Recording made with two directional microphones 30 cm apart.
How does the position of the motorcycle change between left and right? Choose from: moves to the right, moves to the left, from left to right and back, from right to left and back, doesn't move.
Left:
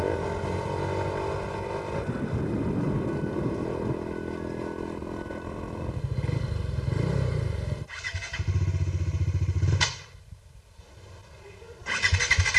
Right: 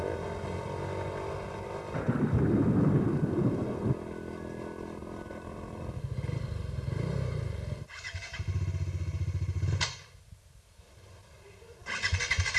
doesn't move.